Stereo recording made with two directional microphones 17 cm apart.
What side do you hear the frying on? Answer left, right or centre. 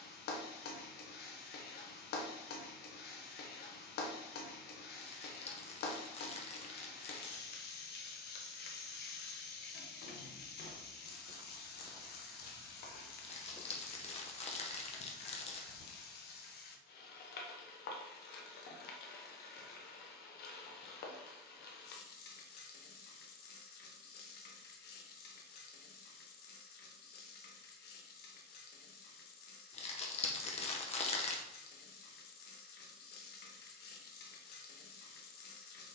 left.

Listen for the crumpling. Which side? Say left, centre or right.
left.